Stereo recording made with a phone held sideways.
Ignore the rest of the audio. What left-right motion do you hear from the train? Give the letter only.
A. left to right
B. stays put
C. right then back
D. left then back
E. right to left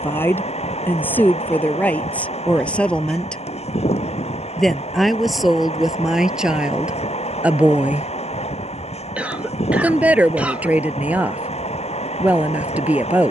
B.